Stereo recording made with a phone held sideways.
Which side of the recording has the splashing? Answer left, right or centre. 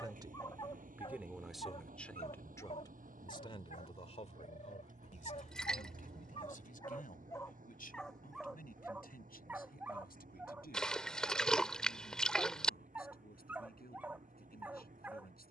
centre.